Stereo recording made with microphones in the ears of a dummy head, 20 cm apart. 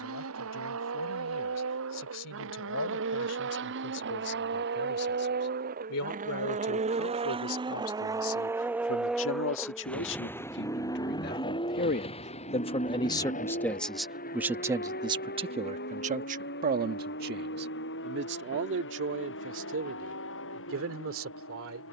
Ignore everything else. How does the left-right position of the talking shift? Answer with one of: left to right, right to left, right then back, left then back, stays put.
left to right.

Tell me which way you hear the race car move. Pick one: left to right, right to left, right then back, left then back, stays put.
right to left.